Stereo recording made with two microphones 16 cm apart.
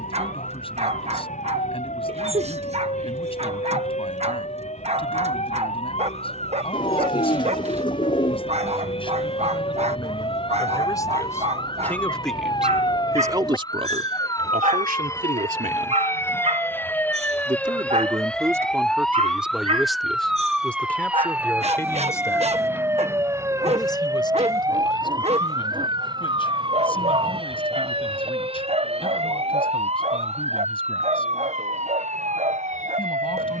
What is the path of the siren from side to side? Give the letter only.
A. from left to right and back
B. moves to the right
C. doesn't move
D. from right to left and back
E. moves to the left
B.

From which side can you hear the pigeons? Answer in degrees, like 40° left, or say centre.
30° left.